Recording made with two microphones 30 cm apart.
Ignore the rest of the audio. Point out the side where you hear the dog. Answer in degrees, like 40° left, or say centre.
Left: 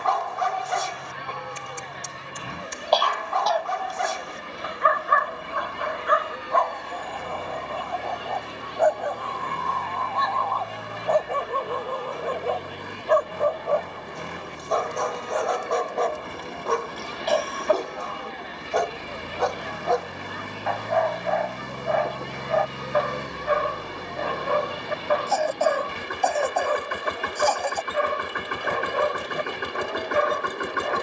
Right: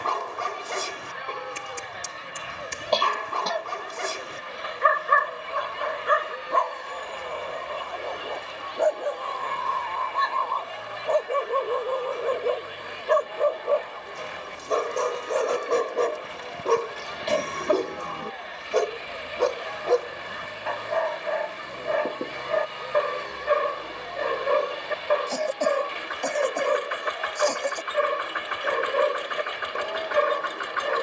30° right.